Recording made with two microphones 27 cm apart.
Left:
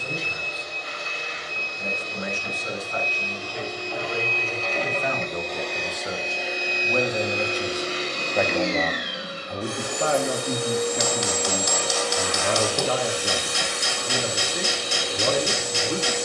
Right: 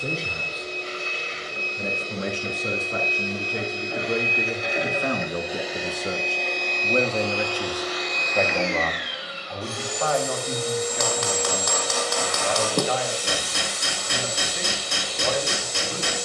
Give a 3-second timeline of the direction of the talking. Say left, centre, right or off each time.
right, right, centre, left, left, left.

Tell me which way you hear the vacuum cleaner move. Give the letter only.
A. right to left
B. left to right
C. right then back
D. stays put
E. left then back
A.